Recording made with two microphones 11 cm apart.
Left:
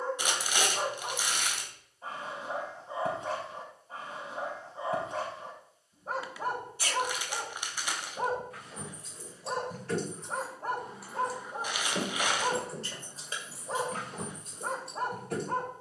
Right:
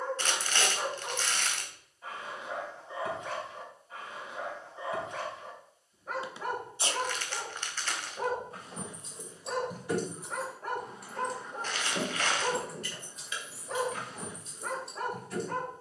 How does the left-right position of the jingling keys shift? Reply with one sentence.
In this clip you hear the jingling keys move from right to left.